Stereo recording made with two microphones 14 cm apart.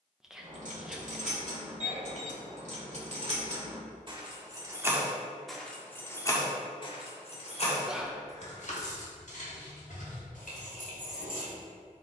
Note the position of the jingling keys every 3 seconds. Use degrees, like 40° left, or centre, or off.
60° right, 20° right, 40° left, 70° left.